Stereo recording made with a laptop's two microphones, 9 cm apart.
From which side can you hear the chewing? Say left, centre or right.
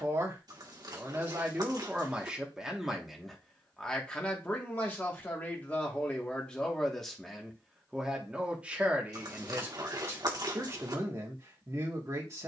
right.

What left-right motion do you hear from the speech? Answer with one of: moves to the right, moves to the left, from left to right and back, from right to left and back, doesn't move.
from right to left and back.